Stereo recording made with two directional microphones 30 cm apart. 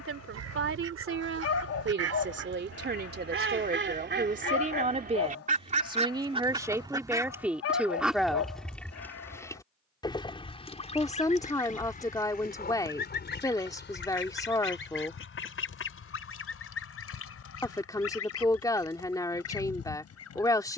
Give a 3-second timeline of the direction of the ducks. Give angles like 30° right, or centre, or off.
50° right, 30° right, 10° right, 20° left, 40° left, 50° left, 50° left.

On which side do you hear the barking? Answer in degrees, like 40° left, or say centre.
50° left.